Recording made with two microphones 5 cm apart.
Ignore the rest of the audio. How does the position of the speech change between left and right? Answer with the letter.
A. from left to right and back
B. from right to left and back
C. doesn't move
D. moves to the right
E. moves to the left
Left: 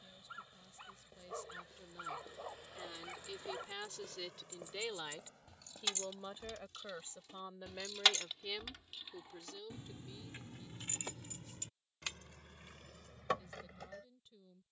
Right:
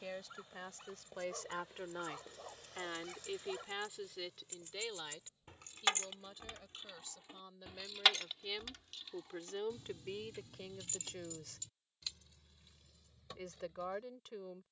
B.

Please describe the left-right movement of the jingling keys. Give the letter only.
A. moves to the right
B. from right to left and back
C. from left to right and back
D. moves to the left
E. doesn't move
D.